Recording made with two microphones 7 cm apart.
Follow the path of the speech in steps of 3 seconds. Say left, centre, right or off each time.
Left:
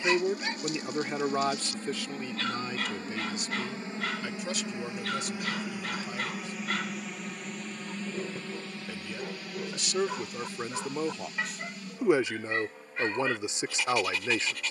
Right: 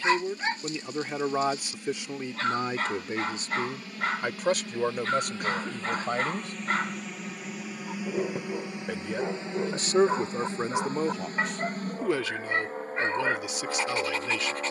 centre, right, right, right, left.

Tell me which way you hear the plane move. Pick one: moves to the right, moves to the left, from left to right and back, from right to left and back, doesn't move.
moves to the right.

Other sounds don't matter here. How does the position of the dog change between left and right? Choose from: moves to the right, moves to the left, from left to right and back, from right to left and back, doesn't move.
doesn't move.